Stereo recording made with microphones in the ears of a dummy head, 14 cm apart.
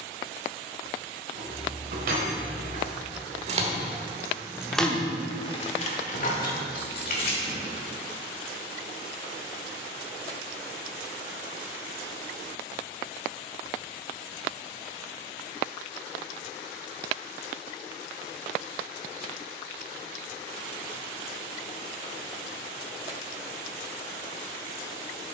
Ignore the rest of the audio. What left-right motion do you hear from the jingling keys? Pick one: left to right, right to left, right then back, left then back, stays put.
right to left.